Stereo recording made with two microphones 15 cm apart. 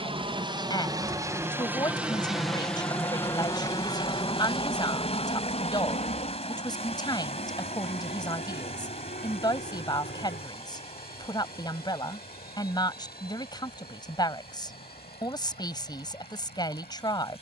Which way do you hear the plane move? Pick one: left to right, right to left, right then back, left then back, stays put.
right to left.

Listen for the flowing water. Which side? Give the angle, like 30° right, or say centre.
40° left.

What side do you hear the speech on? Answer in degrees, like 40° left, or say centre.
30° left.